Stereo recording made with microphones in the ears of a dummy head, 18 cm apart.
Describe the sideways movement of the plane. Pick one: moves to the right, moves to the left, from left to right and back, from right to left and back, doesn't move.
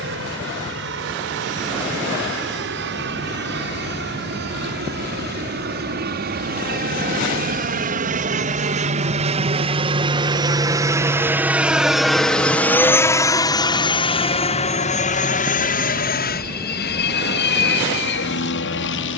moves to the left.